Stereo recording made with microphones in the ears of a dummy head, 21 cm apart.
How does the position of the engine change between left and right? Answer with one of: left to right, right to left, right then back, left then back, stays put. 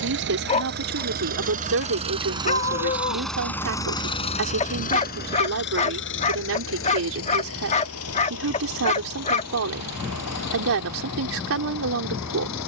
right to left.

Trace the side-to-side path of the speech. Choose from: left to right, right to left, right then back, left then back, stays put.
stays put.